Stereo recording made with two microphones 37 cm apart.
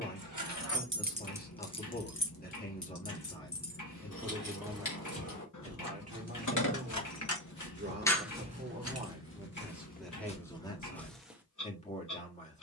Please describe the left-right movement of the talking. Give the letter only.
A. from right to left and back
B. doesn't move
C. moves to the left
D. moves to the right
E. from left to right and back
E.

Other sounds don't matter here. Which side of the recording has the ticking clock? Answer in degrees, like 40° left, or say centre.
50° left.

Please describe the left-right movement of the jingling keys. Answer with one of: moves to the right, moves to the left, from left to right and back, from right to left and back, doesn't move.
from right to left and back.